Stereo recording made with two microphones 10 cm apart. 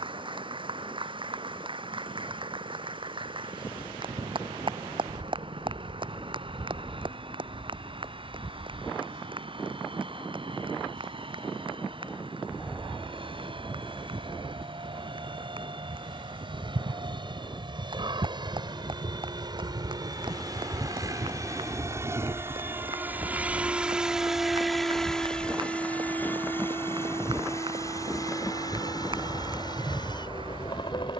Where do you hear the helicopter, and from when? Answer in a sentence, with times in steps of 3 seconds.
You can hear the helicopter on the right from 0 s, in the centre from 24 s and on the left from 27 s.